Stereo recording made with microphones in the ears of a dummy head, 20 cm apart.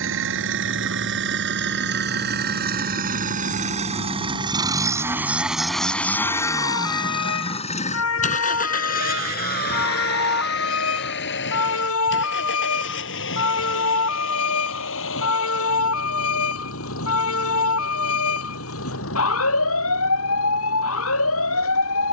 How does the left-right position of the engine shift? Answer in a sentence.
In this clip you hear the engine move to the left.